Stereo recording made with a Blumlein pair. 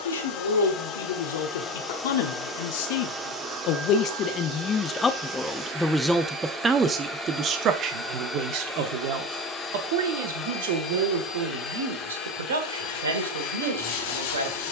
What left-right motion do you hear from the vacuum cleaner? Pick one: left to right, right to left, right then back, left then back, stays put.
right then back.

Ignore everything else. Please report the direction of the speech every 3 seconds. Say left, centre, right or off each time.
left, left, right, right, right.